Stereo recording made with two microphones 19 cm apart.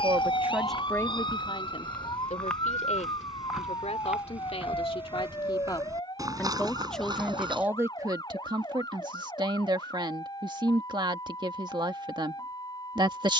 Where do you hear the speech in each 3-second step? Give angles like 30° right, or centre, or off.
20° left, 30° left, 10° right, 20° right, 20° right.